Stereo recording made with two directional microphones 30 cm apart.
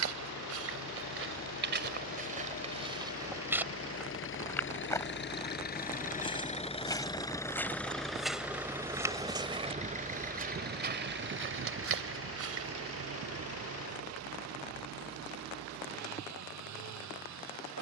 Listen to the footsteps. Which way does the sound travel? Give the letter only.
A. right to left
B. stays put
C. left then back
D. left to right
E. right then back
C.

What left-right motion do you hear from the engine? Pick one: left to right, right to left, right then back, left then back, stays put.
left to right.